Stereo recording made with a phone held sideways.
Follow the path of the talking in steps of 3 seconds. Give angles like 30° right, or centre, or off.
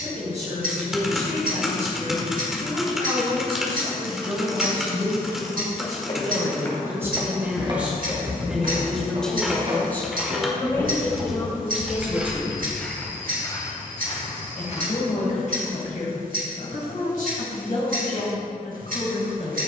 50° right, 30° right, 10° right, 20° left, 40° left, 60° left, 70° left.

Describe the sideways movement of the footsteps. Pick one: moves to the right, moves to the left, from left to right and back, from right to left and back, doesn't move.
from left to right and back.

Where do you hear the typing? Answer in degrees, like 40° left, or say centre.
centre.